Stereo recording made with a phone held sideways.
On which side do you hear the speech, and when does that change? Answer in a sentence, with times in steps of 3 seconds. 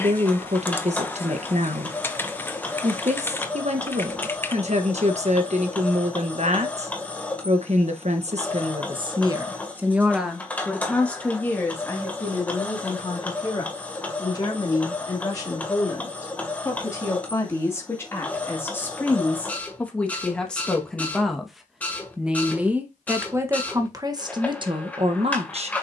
In this clip you hear the speech on the right from 0 s, in the centre from 9 s, on the left from 12 s, in the centre from 18 s and on the right from 24 s.